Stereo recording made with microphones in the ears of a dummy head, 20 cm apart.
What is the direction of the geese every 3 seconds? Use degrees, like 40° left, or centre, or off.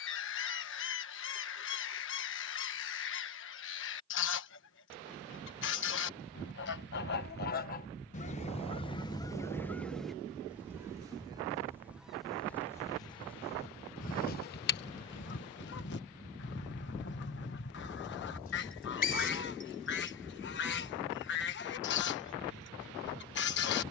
60° left, 60° left, 40° left, centre, 20° left, 50° left, 50° left, 50° left.